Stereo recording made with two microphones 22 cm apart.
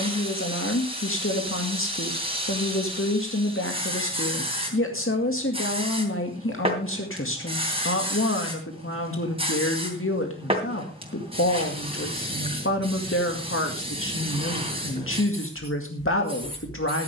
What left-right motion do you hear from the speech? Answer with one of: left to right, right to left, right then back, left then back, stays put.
stays put.